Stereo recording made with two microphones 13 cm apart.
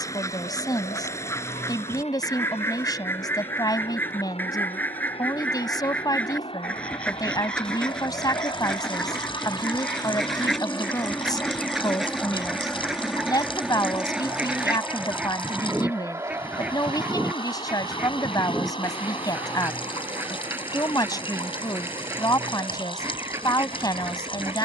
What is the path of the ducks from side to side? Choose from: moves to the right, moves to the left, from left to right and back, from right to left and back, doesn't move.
moves to the right.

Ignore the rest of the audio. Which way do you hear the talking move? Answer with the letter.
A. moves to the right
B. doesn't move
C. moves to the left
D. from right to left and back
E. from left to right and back
B.